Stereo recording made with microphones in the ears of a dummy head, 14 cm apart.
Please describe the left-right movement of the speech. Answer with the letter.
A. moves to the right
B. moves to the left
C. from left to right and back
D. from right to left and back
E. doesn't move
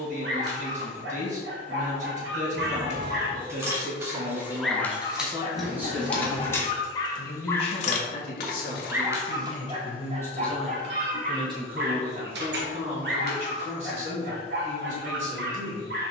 D.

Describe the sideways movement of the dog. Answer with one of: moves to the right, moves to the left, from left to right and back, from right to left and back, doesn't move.
from right to left and back.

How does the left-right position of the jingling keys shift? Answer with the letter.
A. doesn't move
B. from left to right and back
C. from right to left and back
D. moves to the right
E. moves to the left
E.